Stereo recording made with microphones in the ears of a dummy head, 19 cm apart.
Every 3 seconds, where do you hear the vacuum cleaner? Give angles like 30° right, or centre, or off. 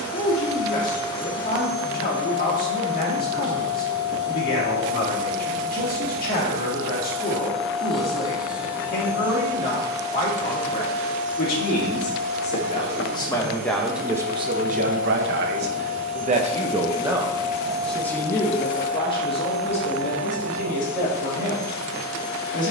20° left, 20° left, centre, 30° right, 50° right, 30° right, centre, 20° left.